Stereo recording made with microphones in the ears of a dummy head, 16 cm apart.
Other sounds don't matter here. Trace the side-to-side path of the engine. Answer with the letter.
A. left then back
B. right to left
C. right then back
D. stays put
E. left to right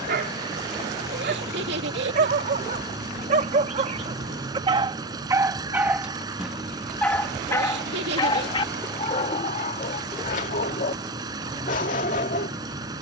D.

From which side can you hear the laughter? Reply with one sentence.
You can hear the laughter on the right.